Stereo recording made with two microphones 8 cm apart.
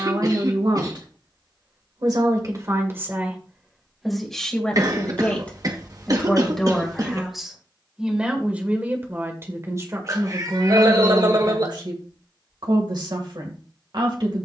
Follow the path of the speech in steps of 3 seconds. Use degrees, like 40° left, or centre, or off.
50° right, centre, centre, 50° right, 60° right.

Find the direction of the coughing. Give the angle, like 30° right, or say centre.
50° right.